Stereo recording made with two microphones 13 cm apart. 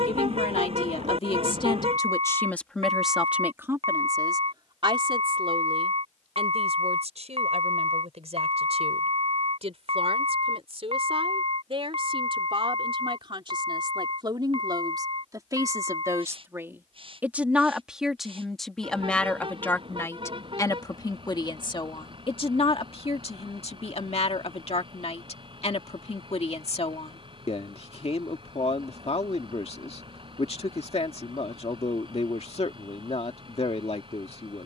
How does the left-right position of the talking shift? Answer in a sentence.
You can hear the talking go right and come back.